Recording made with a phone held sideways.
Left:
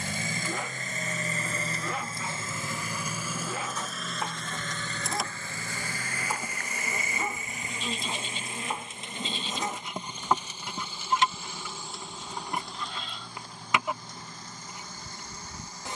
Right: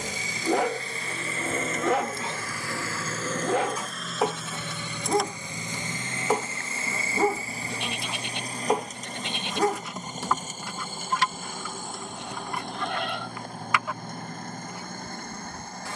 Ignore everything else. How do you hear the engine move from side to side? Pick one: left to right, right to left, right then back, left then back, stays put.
left to right.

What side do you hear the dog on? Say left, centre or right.
right.